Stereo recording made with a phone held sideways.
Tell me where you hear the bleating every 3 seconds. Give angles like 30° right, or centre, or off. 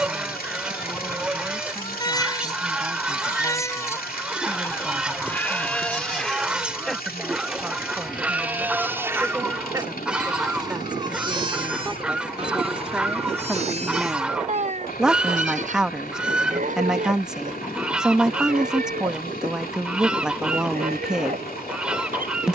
30° left, 20° left, centre, 30° right, 50° right, 60° right, 70° right, 70° right.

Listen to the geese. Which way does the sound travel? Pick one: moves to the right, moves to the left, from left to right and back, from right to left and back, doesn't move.
doesn't move.